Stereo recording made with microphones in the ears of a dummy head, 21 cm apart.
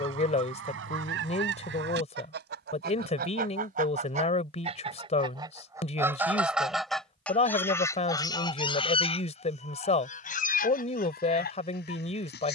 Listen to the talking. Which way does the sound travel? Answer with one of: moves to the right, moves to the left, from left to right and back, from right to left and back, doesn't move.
doesn't move.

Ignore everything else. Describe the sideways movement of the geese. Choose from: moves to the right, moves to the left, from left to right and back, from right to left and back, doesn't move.
moves to the left.